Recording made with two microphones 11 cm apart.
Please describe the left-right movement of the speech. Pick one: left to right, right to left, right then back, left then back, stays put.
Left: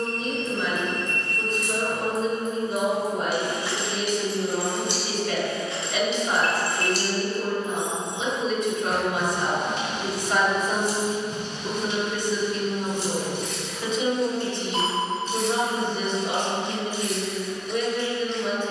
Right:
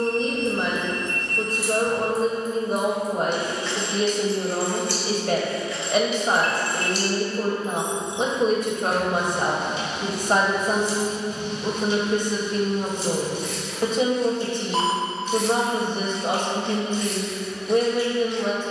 stays put.